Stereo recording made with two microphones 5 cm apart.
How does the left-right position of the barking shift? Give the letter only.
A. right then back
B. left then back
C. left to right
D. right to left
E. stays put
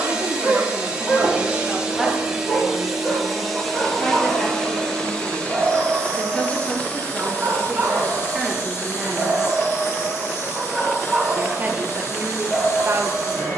A.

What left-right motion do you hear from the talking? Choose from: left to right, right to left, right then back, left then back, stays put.
left then back.